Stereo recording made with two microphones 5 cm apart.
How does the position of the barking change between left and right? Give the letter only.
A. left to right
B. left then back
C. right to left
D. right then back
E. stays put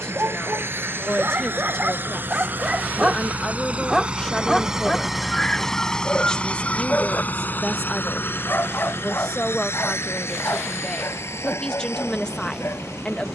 C.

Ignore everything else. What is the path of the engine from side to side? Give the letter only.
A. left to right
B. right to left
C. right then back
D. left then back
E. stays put
B.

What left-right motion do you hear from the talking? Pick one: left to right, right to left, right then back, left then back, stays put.
stays put.